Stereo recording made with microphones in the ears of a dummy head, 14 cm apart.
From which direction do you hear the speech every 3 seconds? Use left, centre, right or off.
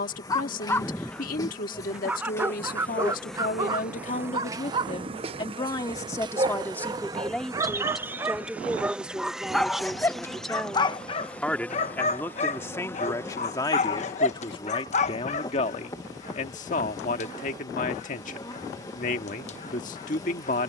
left, left, centre, centre, left, left, left.